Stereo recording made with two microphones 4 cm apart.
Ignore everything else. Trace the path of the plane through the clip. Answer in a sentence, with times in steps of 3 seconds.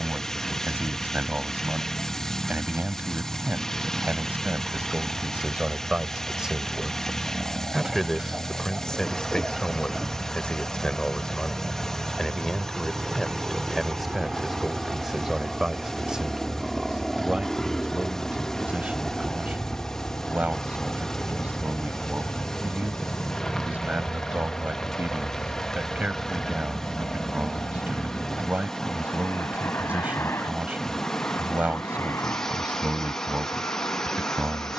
In this clip you hear the plane on the right from 0 s, in the centre from 15 s and on the left from 18 s.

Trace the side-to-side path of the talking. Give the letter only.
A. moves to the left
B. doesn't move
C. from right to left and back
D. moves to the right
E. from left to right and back
C.